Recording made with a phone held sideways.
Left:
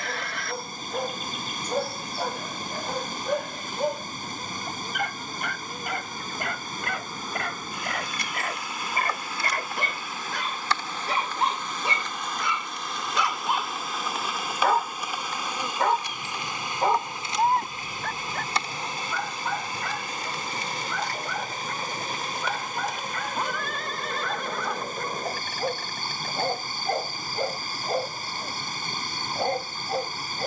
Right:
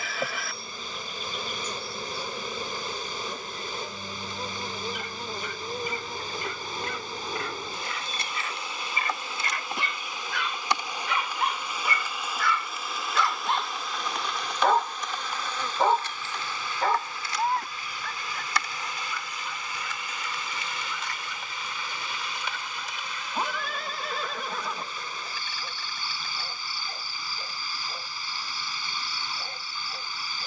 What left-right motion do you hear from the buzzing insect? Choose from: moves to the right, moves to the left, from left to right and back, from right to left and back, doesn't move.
moves to the left.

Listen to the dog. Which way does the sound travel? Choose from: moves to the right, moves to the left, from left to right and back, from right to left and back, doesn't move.
from left to right and back.